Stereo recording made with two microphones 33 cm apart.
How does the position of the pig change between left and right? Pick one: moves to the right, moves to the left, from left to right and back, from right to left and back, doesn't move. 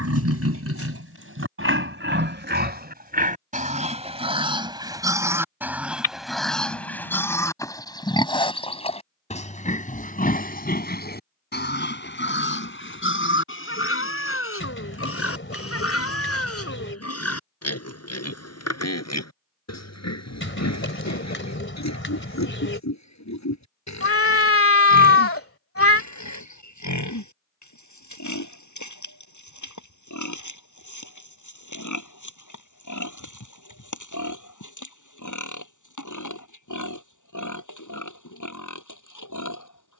moves to the left.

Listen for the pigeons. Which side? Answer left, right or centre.
left.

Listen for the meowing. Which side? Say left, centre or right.
left.